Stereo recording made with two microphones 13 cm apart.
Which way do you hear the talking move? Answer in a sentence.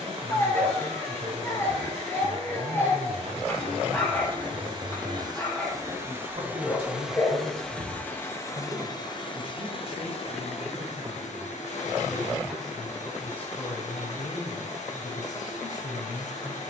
You can hear the talking go from the right side to the left.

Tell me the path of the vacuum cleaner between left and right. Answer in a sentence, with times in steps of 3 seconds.
In this clip you hear the vacuum cleaner on the right from 0 s, in the centre from 6 s and on the left from 9 s.